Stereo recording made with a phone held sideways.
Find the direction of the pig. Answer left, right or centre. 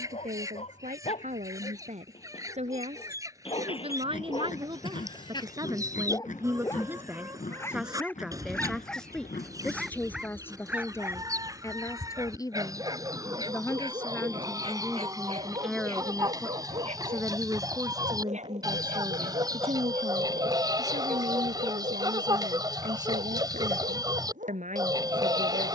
left.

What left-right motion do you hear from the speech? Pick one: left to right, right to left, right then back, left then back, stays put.
left then back.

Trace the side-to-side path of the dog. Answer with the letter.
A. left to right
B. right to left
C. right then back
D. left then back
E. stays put
A.